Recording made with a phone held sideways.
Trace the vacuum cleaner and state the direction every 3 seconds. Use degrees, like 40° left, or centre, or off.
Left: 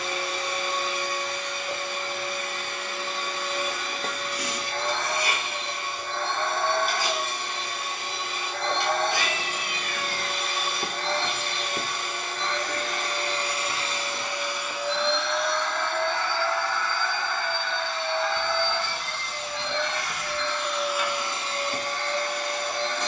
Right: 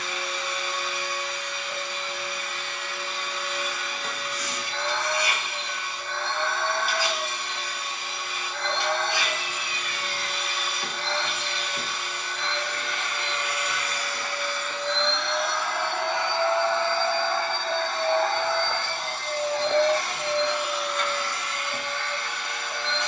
50° left, 50° left, 50° left, 50° left, 30° left, 20° right, 40° right, 40° left.